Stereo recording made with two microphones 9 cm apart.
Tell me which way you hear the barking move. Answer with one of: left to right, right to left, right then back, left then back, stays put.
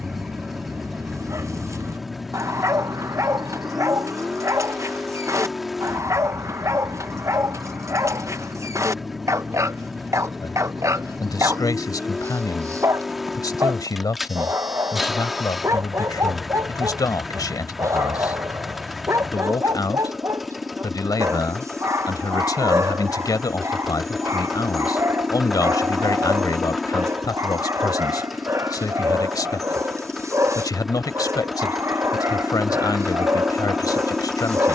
stays put.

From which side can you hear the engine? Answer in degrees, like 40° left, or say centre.
centre.